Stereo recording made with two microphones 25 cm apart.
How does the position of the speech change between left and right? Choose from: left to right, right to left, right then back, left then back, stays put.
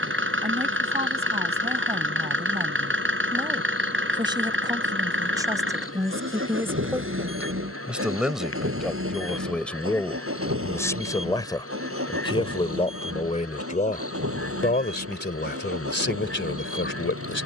right to left.